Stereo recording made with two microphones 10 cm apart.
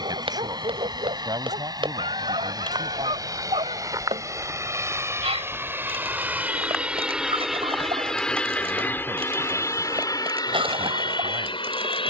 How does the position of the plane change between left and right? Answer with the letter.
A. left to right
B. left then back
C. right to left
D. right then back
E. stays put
C.